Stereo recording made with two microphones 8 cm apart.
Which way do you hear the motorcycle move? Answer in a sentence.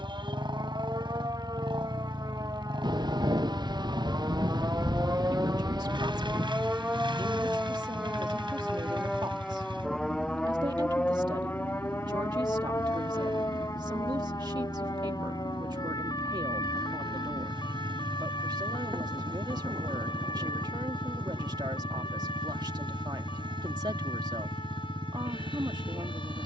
You can hear the motorcycle stay put.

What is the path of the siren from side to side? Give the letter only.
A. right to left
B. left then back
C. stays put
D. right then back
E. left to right
A.